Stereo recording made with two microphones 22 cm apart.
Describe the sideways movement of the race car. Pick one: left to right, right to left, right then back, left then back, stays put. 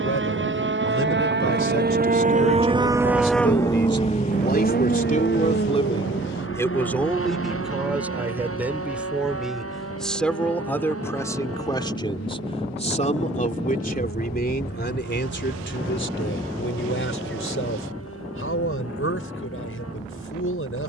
right to left.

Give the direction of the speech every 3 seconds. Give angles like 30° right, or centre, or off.
70° left, 40° left, centre, 10° left, 40° left, 60° left, 80° left.